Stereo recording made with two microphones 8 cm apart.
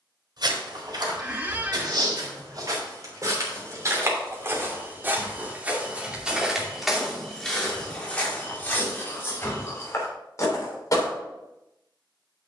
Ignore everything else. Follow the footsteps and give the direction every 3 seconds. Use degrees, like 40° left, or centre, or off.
50° right, 30° right, 10° left, 30° left.